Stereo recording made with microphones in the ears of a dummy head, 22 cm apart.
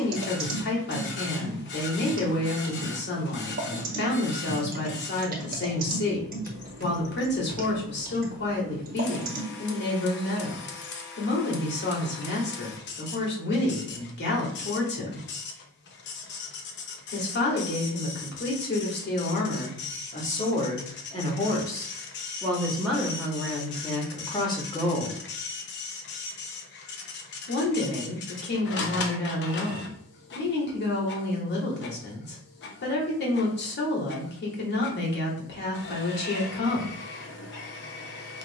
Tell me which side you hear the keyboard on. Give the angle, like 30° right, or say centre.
40° right.